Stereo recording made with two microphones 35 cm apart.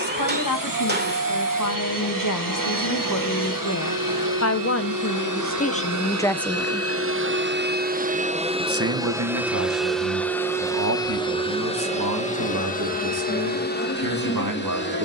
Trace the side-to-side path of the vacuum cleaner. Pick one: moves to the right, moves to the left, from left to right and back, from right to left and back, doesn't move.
moves to the left.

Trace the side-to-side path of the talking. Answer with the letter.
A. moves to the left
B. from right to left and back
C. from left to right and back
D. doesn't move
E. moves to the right
E.